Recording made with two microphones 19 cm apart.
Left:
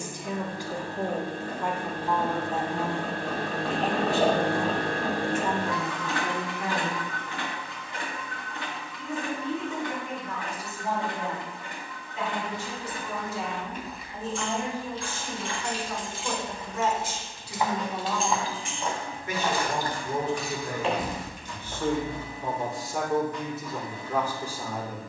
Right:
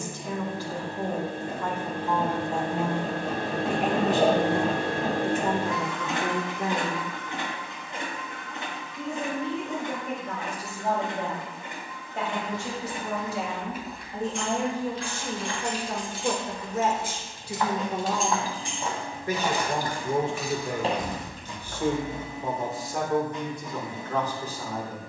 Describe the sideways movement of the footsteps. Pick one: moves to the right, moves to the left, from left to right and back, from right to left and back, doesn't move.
from right to left and back.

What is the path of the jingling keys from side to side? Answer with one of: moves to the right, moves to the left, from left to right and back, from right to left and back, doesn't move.
moves to the left.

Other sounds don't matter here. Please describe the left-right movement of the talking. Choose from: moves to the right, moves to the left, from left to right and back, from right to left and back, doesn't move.
from left to right and back.